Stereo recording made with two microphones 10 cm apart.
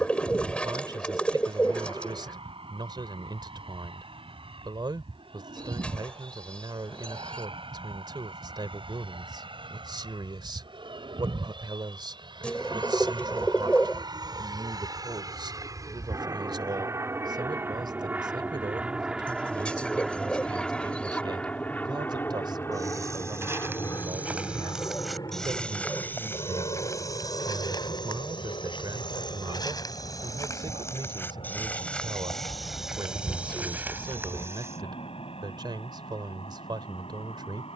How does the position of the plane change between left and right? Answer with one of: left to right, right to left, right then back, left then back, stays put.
right to left.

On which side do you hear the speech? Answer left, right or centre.
right.